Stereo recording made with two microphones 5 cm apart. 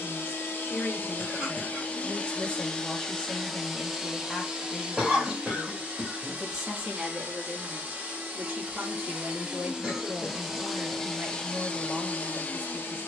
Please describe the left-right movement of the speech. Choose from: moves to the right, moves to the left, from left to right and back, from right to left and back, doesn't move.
moves to the right.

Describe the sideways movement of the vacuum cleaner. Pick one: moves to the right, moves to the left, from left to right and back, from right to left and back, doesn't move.
from left to right and back.